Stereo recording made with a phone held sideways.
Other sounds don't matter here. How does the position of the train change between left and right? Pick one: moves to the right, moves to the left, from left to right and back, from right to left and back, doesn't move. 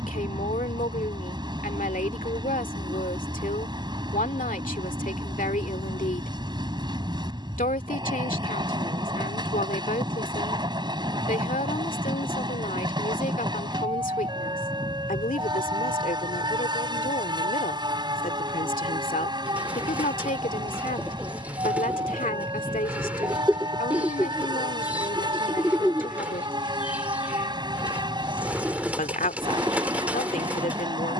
doesn't move.